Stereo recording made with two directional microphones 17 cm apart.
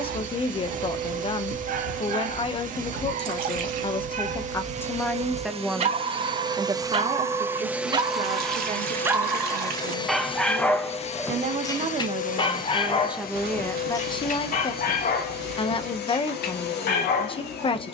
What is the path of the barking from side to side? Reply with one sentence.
You can hear the barking go from the right side to the left.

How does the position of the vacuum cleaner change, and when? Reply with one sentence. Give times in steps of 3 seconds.
You can hear the vacuum cleaner on the right from 0 s, in the centre from 6 s and on the left from 9 s.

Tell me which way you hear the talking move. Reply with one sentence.
In this clip you hear the talking go right and come back.